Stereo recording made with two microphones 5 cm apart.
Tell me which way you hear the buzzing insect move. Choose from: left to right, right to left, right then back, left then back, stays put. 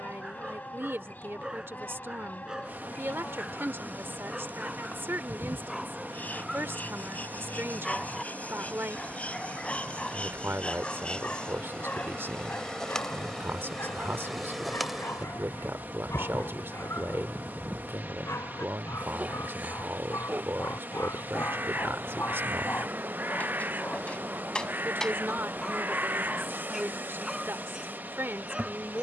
left to right.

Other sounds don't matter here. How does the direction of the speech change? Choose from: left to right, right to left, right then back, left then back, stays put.
stays put.